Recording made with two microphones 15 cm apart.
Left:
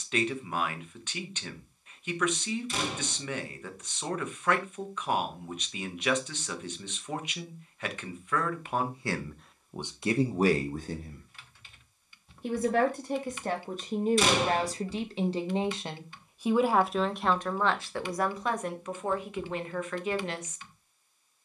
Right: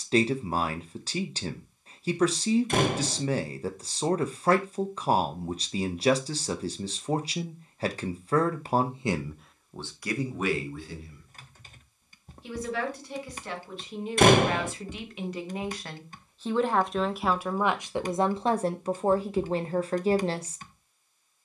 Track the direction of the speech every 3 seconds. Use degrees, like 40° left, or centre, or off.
40° right, 40° right, 40° right, 30° left, 50° left, 10° left, 30° right.